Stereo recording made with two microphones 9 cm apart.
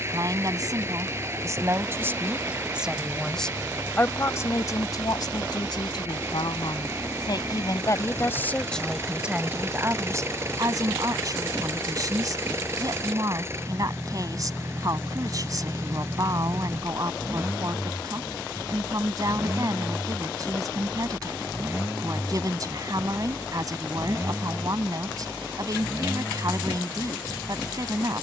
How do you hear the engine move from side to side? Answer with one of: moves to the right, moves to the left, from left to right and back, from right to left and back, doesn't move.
doesn't move.